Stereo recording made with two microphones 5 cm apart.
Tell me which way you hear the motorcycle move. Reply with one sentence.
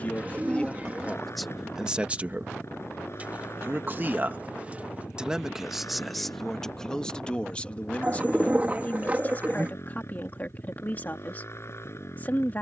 You can hear the motorcycle stay put.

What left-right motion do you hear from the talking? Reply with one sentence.
In this clip you hear the talking go right and come back.